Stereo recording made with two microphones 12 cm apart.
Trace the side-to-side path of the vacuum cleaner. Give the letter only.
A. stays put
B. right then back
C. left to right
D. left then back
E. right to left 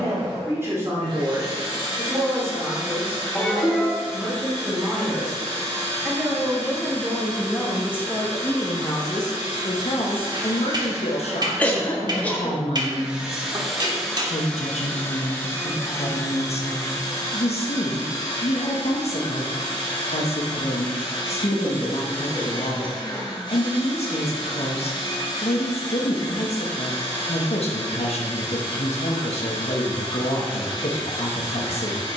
E.